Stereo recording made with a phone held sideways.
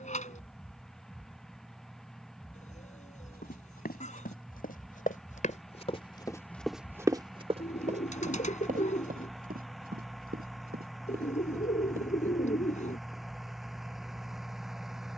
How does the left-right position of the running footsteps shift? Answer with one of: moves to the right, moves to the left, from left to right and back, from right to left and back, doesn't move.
moves to the right.